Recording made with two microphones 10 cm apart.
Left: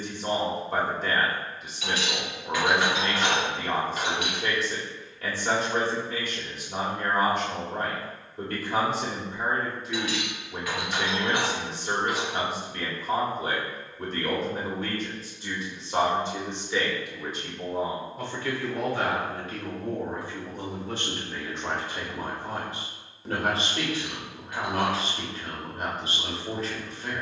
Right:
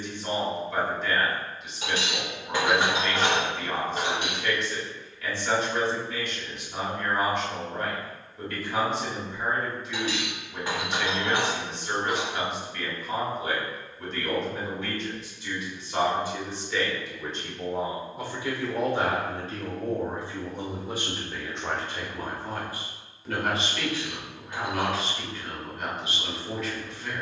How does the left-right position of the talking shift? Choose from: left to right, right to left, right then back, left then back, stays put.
right then back.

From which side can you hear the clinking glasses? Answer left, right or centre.
right.